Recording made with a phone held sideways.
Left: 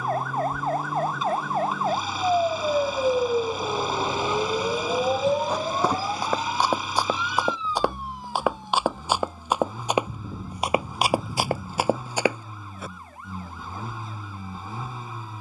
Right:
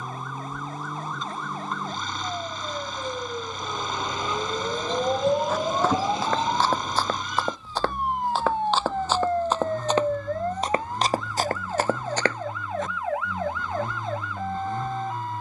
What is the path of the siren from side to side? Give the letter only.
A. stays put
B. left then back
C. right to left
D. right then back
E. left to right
E.